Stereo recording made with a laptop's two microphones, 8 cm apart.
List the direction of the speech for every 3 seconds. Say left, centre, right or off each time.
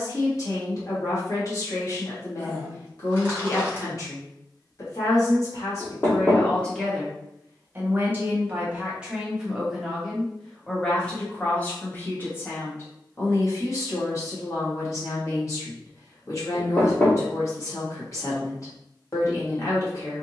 left, left, centre, centre, left, left, left.